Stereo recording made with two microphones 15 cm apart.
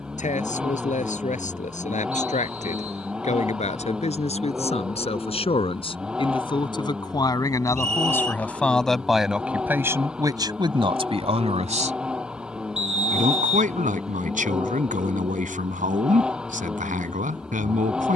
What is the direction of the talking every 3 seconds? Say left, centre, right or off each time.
left, left, left, right, right, right.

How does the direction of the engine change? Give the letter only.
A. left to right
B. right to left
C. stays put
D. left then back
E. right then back
C.